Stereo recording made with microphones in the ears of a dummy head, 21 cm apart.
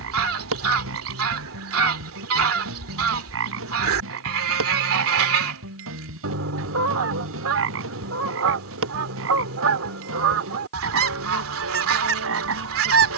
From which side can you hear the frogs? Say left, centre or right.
right.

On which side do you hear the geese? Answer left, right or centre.
right.